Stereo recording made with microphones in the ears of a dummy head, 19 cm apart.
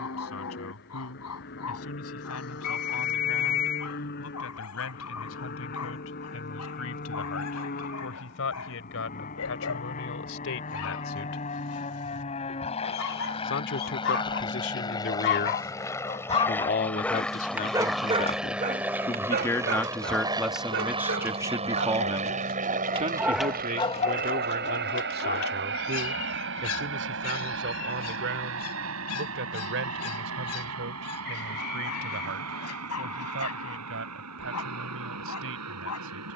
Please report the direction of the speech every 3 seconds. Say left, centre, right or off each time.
left, left, left, left, left, left, centre, right, right, right, right, right.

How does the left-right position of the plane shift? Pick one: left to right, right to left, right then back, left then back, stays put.
left to right.